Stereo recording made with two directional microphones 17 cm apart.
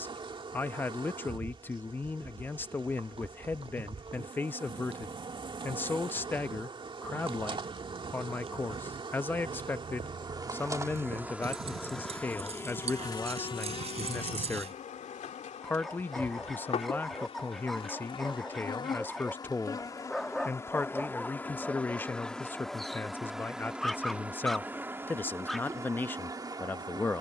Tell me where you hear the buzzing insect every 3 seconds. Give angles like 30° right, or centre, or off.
30° right, 30° right, 30° right, 20° right, 30° left, 40° left, 20° left, centre, 20° right.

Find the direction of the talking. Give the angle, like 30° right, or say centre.
10° left.